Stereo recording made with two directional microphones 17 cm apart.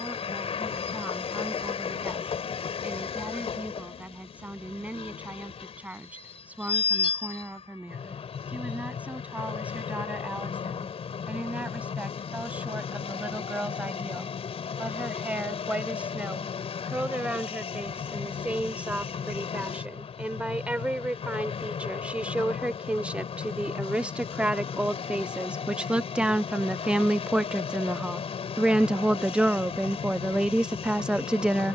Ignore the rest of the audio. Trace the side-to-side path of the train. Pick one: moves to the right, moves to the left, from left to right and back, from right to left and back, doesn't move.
doesn't move.